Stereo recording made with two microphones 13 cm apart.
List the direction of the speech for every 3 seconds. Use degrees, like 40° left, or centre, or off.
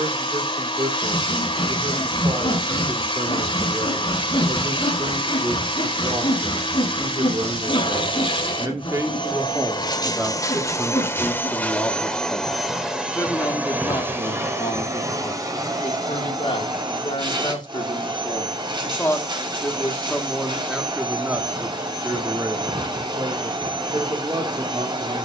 40° right, 40° right, 40° right, 10° right, 30° left, 40° left, 10° left, 20° right, 30° right.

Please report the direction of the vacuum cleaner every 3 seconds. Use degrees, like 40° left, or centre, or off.
40° left, 40° left, 40° left, 30° left, 10° right, 30° right, 40° right, 40° right, 40° right.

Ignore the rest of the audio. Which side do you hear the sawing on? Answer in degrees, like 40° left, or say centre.
30° left.